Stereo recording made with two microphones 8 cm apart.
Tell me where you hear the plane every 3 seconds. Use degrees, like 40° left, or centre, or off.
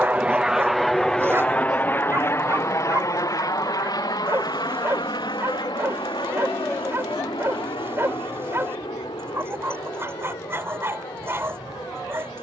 10° left, 50° left, 60° left, 70° left.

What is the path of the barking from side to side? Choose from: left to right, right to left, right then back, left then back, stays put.
stays put.